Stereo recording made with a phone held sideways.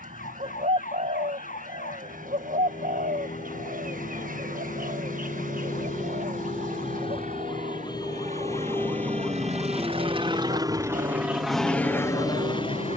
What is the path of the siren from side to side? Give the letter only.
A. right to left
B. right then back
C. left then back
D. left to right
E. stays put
D.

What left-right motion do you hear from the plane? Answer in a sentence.
In this clip you hear the plane move from right to left.